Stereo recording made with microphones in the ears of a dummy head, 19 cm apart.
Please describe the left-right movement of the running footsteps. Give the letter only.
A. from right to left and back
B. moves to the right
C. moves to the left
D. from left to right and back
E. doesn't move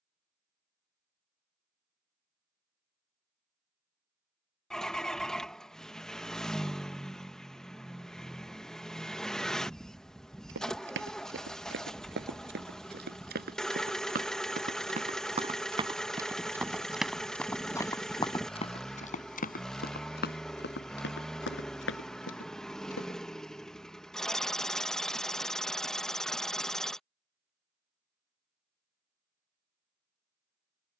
C.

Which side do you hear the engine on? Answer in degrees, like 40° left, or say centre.
centre.